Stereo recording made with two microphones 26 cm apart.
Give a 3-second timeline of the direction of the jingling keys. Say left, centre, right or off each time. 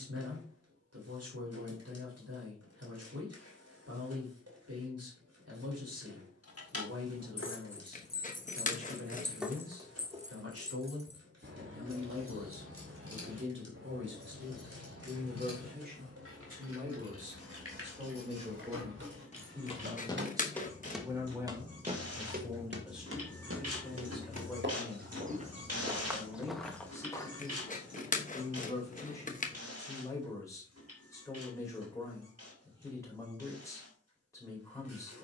off, off, left, right, right, right, right, centre, left, off, off, off.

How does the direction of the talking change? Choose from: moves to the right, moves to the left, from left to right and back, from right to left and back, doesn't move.
moves to the left.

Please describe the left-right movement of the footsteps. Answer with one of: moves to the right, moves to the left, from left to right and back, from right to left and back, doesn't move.
from left to right and back.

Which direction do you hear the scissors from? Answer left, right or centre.
left.